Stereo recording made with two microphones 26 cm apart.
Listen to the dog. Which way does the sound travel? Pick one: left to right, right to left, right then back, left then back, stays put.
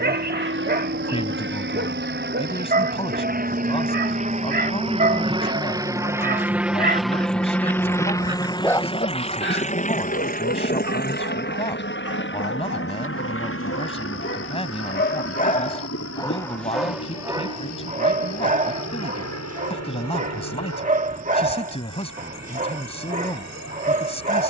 left then back.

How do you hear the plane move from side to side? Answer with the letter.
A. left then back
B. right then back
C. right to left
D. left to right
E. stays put
C.